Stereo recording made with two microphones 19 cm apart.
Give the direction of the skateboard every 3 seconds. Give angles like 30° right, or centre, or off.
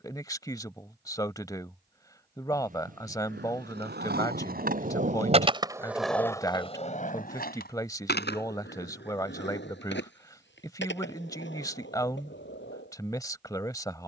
off, 50° right, 50° left, 80° left, 80° left.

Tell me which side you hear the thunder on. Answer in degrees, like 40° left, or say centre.
50° right.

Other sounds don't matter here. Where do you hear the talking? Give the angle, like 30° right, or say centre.
20° left.